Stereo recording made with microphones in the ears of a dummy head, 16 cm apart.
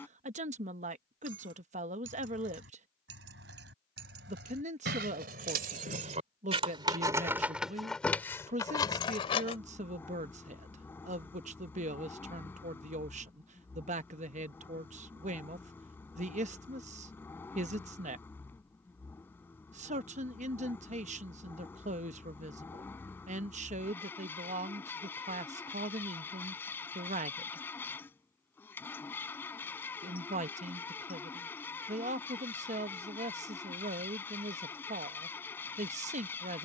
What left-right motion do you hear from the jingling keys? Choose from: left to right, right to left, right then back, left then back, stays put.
right to left.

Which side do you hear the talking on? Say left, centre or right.
right.